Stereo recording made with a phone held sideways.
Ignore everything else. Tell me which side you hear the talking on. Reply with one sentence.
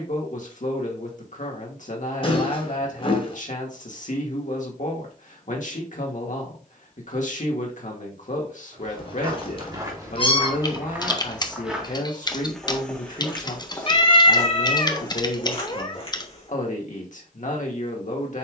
In this clip you hear the talking on the left.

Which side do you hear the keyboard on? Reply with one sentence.
In this clip you hear the keyboard on the left.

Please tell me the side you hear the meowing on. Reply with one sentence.
In this clip you hear the meowing on the left.